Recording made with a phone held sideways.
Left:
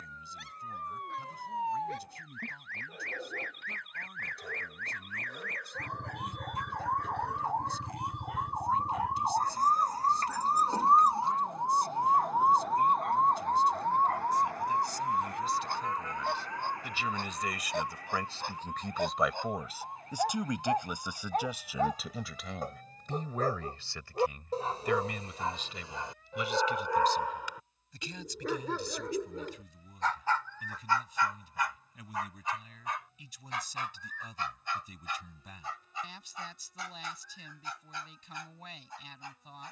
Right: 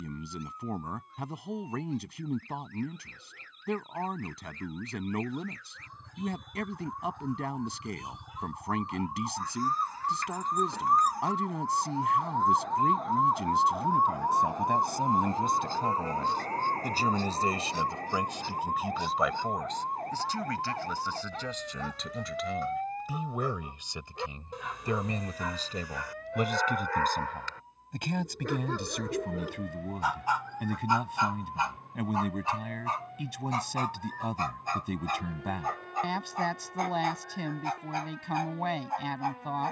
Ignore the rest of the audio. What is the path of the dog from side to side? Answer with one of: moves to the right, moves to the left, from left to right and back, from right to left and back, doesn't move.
moves to the right.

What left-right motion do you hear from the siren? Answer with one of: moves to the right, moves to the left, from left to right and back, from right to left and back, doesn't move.
moves to the right.